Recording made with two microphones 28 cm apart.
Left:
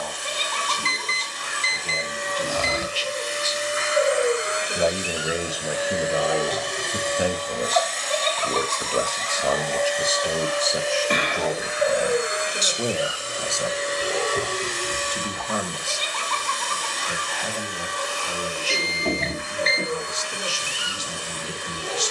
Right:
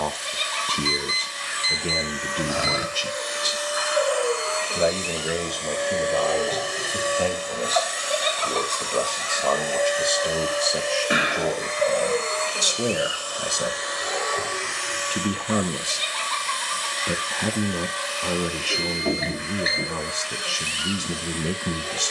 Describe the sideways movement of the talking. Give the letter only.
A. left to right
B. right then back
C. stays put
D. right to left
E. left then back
E.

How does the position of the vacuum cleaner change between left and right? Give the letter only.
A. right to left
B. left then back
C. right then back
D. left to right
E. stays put
C.